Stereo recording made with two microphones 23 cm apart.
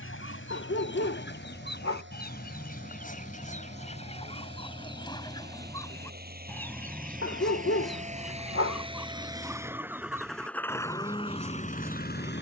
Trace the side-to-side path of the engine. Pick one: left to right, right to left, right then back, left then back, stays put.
right to left.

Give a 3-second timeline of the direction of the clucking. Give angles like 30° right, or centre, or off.
50° left, 20° left, centre, 10° right.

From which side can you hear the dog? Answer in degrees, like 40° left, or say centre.
60° left.